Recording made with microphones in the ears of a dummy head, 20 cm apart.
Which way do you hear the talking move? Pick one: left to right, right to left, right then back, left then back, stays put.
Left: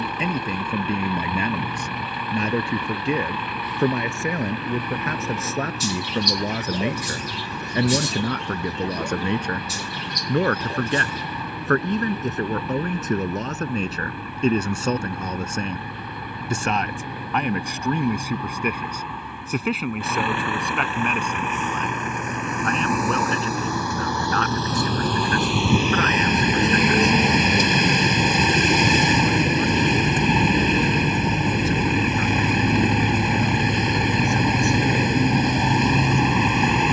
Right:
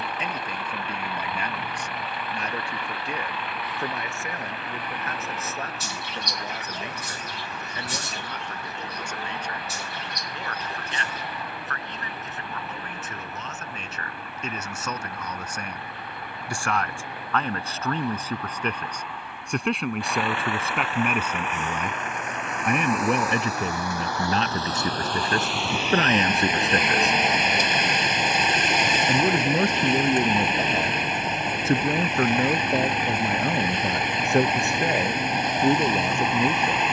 left to right.